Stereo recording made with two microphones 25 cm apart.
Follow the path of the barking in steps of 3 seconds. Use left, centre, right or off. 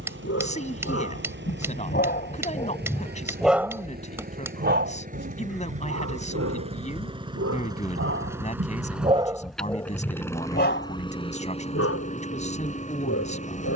left, right, right, left, left.